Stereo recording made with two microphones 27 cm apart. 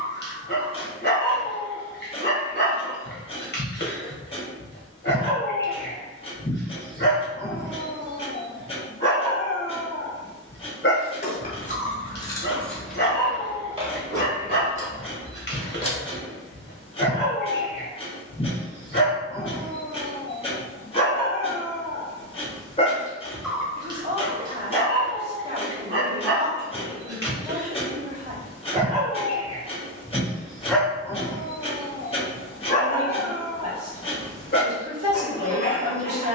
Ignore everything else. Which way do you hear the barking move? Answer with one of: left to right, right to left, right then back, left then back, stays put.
right then back.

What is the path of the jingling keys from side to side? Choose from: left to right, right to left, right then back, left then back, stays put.
right then back.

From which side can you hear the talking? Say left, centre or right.
right.